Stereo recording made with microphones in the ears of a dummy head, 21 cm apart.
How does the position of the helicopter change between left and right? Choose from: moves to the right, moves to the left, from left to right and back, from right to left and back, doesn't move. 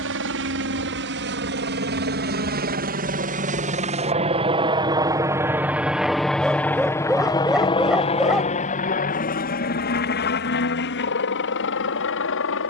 moves to the left.